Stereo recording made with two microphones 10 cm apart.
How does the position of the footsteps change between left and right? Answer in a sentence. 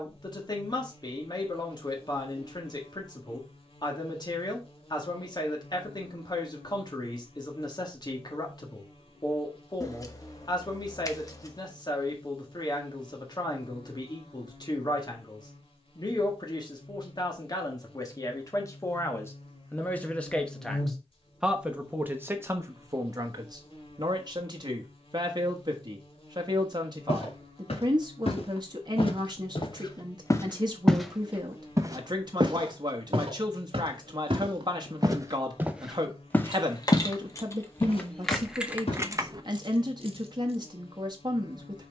You can hear the footsteps go right and come back.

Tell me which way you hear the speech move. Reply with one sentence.
In this clip you hear the speech move to the right.